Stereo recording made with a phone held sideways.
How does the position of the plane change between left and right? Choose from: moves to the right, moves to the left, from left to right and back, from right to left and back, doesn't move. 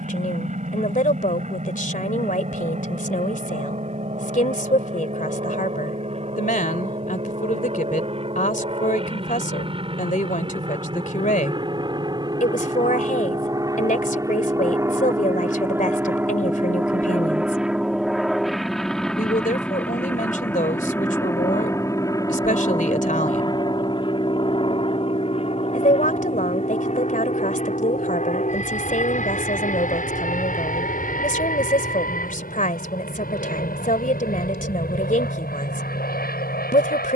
moves to the left.